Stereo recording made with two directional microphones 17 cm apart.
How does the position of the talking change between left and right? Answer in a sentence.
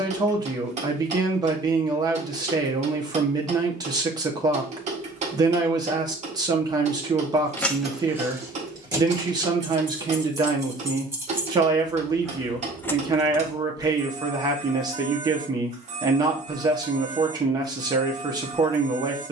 In this clip you hear the talking stay in one place.